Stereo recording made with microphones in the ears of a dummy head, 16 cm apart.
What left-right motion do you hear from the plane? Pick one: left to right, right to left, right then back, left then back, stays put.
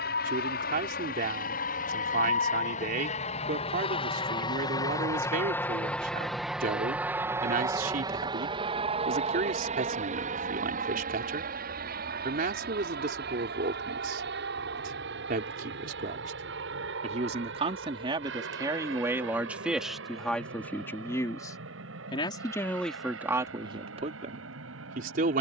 left to right.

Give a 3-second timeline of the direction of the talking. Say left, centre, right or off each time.
right, right, right, right, right, right, centre, centre, right.